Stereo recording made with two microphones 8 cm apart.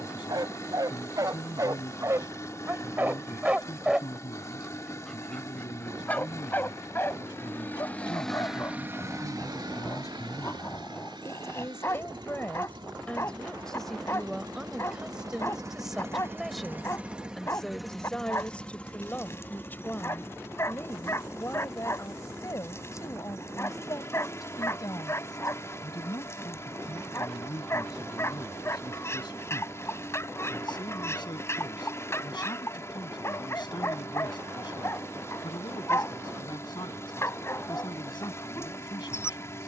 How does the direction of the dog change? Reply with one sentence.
You can hear the dog go from the right side to the left.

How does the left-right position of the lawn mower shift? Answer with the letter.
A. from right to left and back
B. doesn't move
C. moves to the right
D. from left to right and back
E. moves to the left
D.